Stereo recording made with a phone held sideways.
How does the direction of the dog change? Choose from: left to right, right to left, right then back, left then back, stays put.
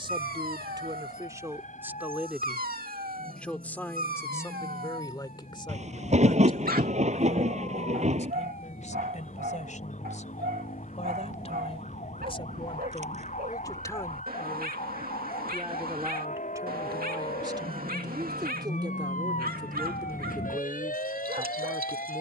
stays put.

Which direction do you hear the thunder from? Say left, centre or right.
right.